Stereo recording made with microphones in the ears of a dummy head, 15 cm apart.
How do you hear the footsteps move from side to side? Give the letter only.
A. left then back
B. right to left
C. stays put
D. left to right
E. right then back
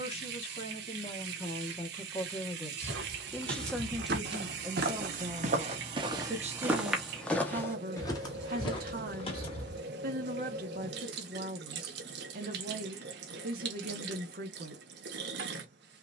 B.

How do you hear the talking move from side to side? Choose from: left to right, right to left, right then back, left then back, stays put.
left to right.